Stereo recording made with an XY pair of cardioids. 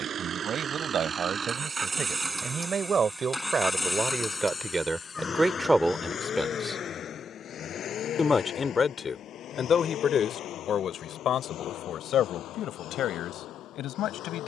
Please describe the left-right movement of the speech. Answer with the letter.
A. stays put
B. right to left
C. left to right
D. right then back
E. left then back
B.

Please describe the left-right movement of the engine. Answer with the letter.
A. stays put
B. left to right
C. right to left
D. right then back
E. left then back
C.